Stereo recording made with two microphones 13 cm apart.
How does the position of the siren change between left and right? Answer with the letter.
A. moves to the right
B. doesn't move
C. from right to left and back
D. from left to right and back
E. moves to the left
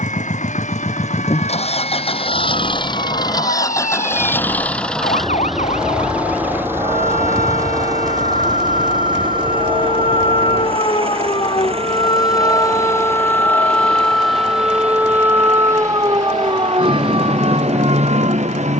A.